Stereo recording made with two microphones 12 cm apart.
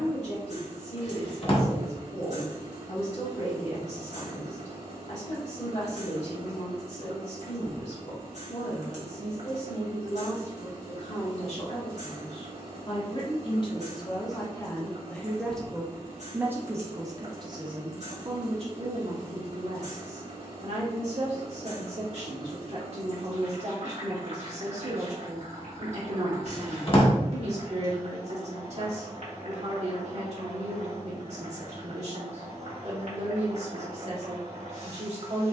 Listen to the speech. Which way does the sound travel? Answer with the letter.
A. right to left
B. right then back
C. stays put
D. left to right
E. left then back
D.